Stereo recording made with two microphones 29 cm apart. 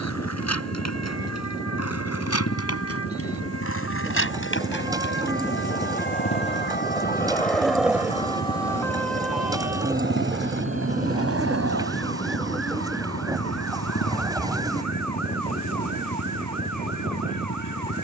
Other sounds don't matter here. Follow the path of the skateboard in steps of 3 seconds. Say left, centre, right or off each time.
left, left, centre, right, right, off.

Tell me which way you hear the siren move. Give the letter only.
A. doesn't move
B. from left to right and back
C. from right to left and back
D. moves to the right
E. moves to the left
D.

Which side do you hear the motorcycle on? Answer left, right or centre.
left.